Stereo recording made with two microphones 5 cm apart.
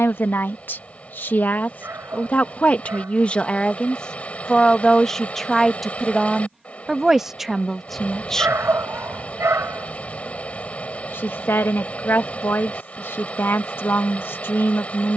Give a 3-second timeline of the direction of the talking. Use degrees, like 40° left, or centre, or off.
40° left, 10° left, centre, 50° left, 50° left.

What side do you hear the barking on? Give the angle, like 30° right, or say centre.
60° right.